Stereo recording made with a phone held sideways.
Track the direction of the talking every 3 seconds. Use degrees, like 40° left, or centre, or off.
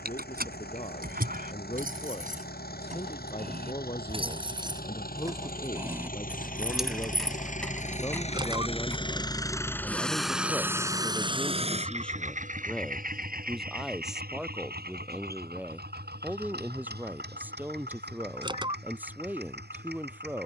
40° left, 30° left, 20° left, 10° left, centre, 10° right, 10° right.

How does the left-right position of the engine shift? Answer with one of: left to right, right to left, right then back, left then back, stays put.
left to right.